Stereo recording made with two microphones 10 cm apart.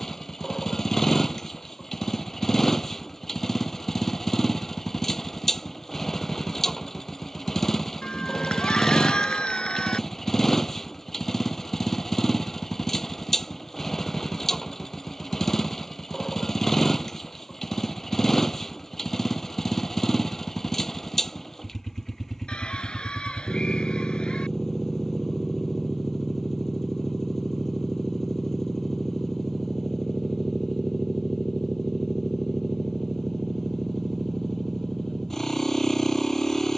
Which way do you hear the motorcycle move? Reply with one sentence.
In this clip you hear the motorcycle stay in one place.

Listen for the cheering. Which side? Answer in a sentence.
You can hear the cheering in the centre.